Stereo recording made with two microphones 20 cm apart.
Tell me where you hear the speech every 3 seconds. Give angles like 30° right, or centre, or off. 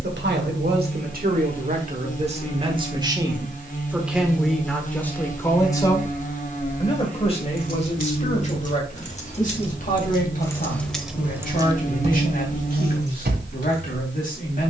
40° right, centre, 30° left, 40° left, 40° left.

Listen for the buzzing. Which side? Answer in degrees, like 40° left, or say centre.
40° left.